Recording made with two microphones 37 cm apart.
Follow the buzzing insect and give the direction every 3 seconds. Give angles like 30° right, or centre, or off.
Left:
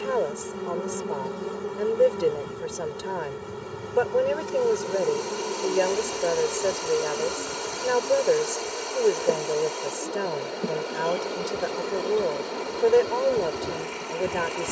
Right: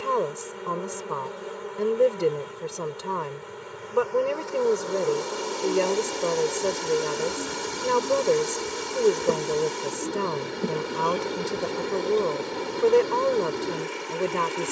60° left, 40° left, centre, centre, 40° left.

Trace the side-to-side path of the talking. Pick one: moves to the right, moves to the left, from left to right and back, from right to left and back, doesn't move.
doesn't move.